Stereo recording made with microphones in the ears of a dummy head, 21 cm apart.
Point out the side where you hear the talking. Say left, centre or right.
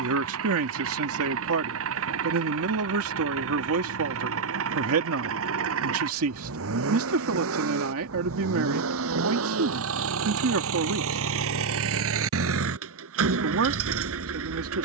right.